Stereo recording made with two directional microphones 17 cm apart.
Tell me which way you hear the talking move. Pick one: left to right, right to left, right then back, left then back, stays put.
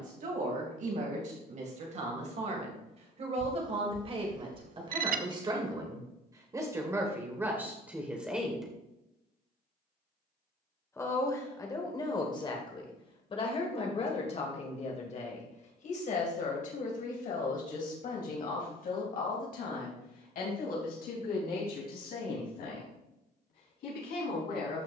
right to left.